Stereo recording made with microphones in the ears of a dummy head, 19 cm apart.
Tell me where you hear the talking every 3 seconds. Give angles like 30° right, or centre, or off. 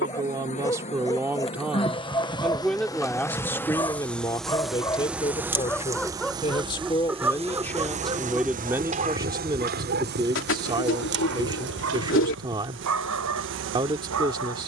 10° right, 20° left, 10° left, 20° right, 20° right.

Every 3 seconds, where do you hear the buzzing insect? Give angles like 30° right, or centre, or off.
30° left, centre, 30° right, 50° right, 60° right.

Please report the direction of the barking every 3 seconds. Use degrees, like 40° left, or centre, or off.
20° left, 10° left, 10° right, 50° right, 80° right.